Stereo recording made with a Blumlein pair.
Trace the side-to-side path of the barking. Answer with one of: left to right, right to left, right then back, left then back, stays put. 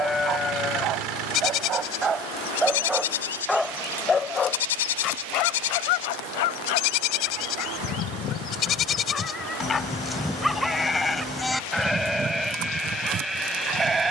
left then back.